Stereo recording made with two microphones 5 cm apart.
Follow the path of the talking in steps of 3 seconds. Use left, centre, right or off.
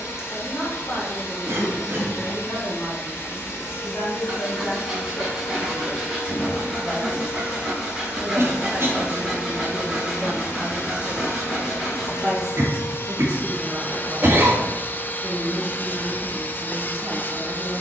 left, left, left, centre, right, right.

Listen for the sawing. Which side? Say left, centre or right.
centre.